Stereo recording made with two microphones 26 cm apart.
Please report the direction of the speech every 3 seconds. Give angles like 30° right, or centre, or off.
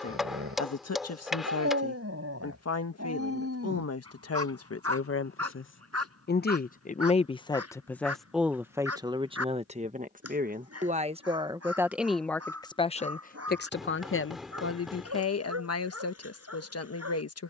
70° left, 70° left, 10° left, 20° right, 40° left, 70° left.